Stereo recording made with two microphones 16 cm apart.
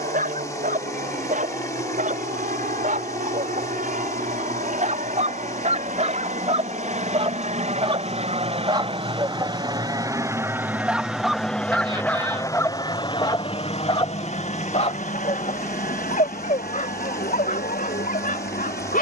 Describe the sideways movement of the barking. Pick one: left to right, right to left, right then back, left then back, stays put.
right to left.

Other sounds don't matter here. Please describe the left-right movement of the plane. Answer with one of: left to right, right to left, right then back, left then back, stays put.
right to left.